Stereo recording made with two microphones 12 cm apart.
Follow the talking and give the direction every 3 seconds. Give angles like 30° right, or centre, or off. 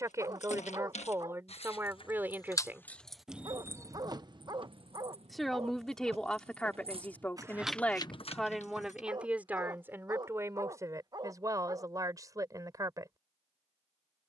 20° right, centre, 10° left, 20° right, 30° right.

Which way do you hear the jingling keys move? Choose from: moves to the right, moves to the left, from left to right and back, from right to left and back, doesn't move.
from left to right and back.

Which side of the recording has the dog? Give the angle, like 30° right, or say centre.
30° right.